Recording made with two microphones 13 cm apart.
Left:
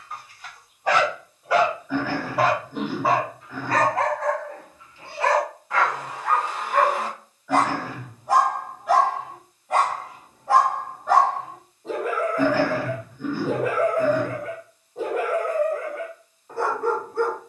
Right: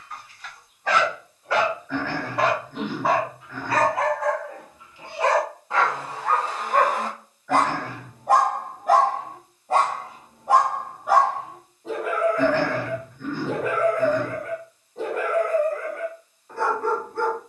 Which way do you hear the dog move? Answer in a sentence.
You can hear the dog move from left to right and back again.